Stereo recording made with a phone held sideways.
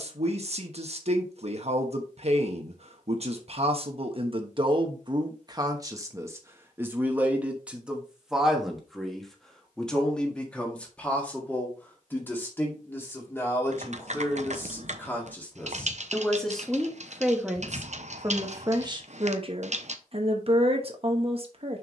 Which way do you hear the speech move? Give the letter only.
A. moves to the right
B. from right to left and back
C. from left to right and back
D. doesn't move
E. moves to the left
B.